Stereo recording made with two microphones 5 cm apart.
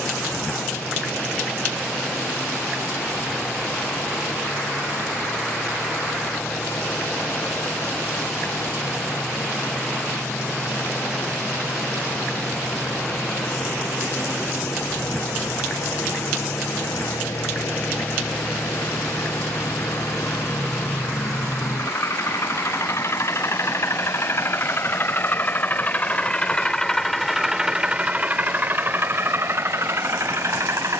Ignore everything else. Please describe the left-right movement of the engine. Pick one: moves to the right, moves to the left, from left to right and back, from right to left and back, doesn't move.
moves to the right.